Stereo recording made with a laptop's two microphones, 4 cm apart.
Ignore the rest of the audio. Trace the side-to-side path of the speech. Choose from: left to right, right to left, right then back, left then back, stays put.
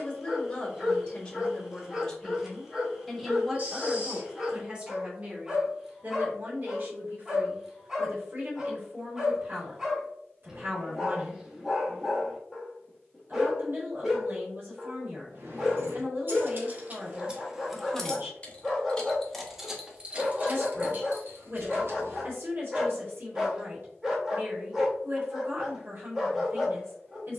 left to right.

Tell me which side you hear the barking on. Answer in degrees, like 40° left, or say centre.
10° right.